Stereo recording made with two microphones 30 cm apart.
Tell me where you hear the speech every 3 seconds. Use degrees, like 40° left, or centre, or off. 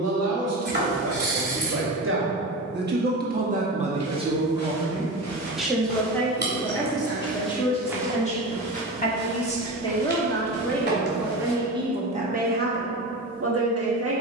50° right, 20° right, 10° left, 10° left, 40° right.